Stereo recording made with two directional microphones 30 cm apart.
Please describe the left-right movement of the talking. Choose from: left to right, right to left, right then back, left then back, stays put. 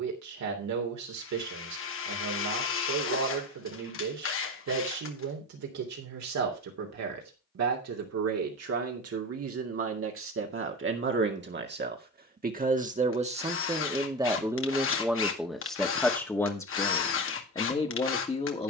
right to left.